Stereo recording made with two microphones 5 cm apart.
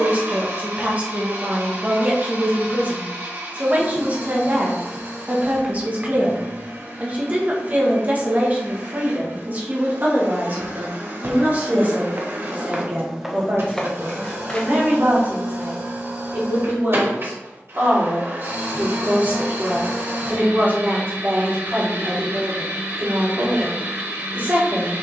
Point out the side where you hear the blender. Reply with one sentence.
In this clip you hear the blender on the right.